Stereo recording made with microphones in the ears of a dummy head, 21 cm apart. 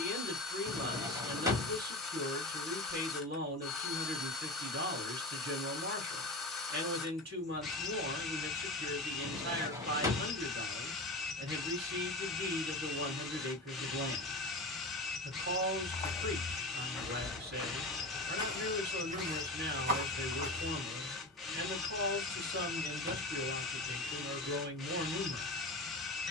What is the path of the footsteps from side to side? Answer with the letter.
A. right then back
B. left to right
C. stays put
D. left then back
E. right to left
B.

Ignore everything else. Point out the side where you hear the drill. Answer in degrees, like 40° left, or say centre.
centre.